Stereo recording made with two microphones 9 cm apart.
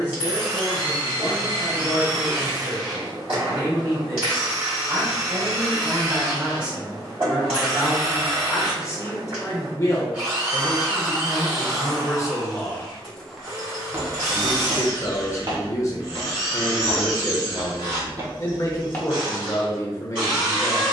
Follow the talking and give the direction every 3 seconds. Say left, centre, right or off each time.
right, right, centre, left, left, left, left.